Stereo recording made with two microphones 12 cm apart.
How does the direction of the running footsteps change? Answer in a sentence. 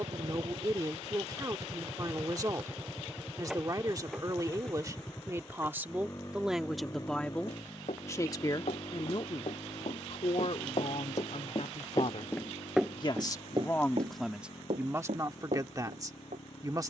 You can hear the running footsteps travel towards the right.